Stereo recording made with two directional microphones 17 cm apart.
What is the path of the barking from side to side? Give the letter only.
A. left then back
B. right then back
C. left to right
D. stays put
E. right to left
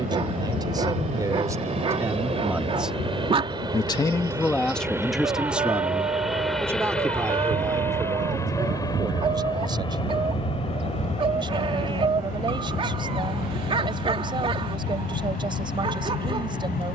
D.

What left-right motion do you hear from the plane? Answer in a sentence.
In this clip you hear the plane move to the left.